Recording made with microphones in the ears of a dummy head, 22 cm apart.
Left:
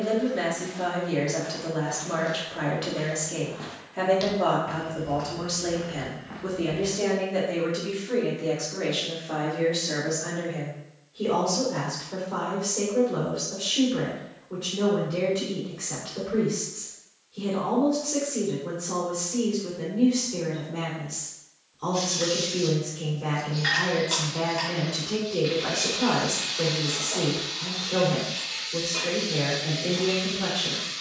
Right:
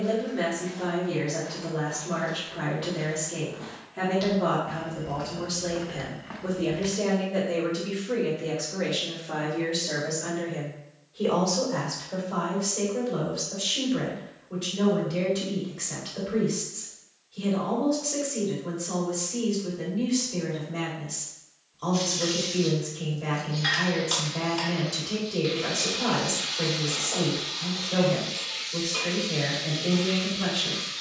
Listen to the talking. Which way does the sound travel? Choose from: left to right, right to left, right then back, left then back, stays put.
left to right.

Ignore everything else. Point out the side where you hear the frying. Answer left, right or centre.
centre.